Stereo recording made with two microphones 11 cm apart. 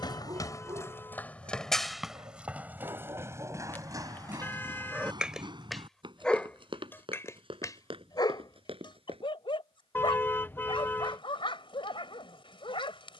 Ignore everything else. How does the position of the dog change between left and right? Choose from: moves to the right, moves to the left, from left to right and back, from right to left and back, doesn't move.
moves to the left.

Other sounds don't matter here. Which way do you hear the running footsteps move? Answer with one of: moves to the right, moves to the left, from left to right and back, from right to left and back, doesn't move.
moves to the right.